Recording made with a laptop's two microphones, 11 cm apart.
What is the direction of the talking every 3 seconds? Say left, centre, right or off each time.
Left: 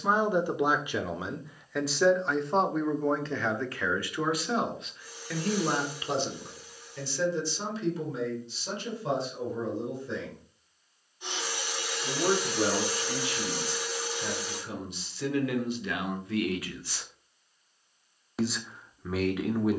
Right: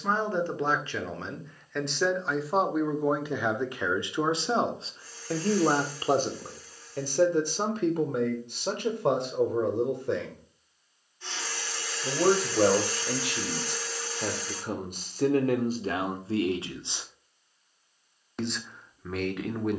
centre, right, right, right, right, right, centre.